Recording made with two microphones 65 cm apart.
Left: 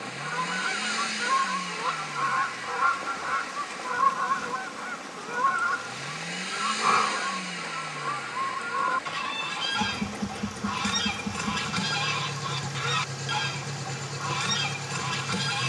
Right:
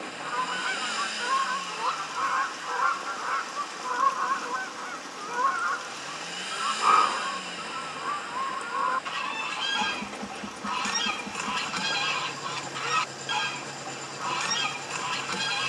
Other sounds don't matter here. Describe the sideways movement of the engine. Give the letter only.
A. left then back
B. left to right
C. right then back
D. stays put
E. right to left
D.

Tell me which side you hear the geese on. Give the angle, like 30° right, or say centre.
50° left.